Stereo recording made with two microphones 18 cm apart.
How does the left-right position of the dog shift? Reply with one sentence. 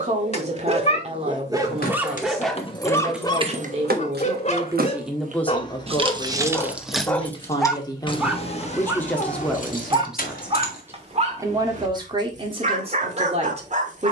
You can hear the dog move from right to left and back again.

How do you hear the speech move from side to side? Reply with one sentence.
You can hear the speech go left and come back.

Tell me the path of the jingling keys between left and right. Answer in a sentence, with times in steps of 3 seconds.
In this clip you hear the jingling keys on the left from 0 s, on the right from 3 s, in the centre from 6 s, on the left from 9 s and not at all from 12 s.